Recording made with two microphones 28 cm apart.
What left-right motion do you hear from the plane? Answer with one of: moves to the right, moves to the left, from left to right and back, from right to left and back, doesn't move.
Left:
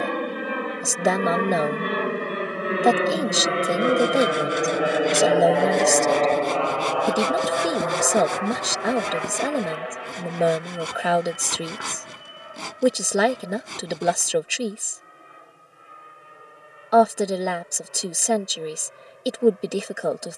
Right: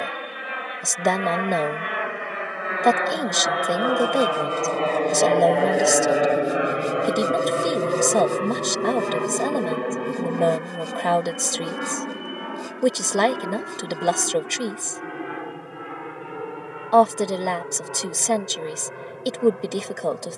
moves to the right.